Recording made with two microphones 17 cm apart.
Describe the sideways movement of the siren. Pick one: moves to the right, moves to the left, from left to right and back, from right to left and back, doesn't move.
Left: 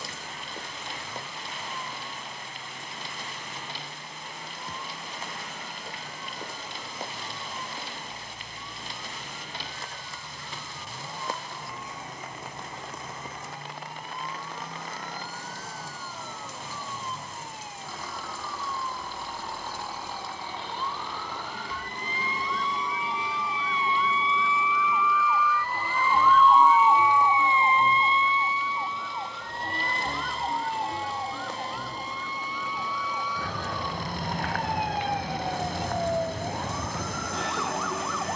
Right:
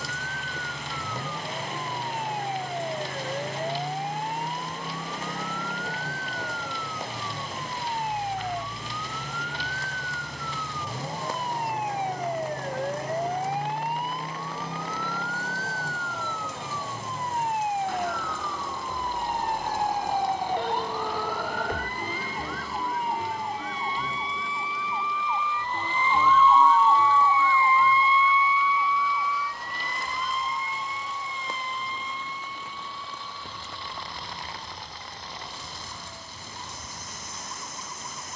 moves to the left.